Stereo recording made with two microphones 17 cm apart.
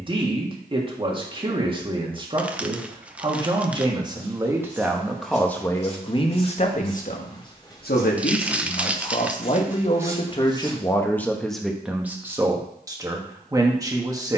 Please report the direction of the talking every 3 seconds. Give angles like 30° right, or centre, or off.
30° right, 10° right, 50° left, 30° left, 20° right.